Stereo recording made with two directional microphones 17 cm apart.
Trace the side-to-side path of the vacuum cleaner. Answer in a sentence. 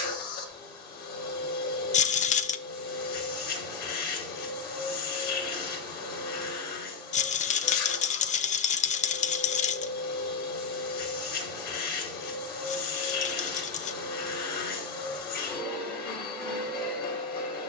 In this clip you hear the vacuum cleaner stay put.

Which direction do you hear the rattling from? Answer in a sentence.
You can hear the rattling on the left.